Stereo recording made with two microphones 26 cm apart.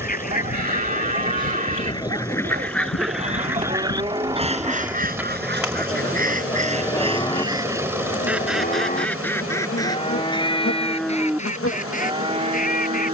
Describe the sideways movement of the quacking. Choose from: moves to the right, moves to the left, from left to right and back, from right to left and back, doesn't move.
from left to right and back.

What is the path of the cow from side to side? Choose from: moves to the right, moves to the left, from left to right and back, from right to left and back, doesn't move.
from right to left and back.